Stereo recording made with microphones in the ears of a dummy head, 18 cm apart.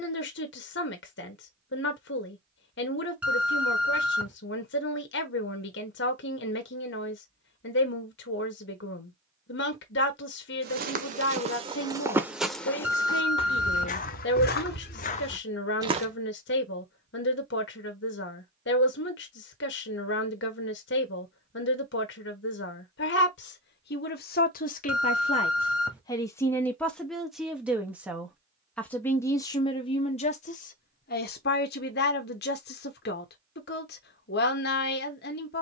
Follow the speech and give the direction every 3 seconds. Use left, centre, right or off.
left, left, left, left, left, left, left, left, left, centre, left, left.